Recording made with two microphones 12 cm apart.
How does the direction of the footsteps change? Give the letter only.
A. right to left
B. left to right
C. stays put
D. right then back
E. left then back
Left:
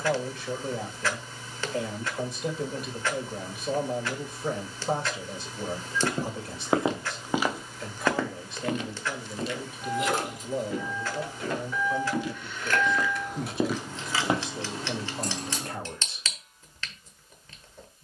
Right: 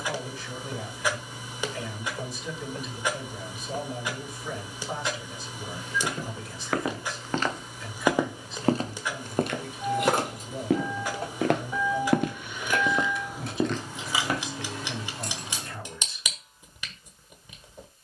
D.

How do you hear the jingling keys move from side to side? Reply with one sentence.
In this clip you hear the jingling keys travel towards the left.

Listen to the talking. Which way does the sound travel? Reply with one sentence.
You can hear the talking stay put.